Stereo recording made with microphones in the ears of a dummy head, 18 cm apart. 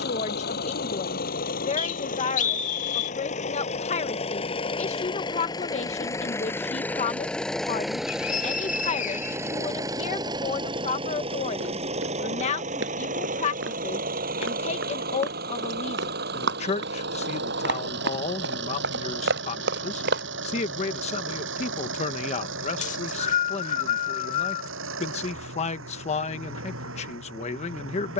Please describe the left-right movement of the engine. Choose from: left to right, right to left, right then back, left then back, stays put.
left to right.